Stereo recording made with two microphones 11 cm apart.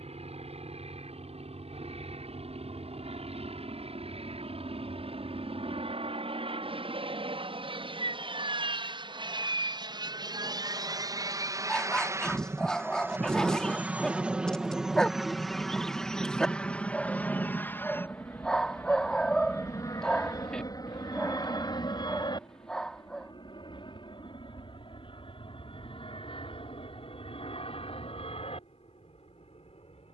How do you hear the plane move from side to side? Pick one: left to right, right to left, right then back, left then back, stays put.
right to left.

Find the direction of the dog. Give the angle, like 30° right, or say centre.
10° left.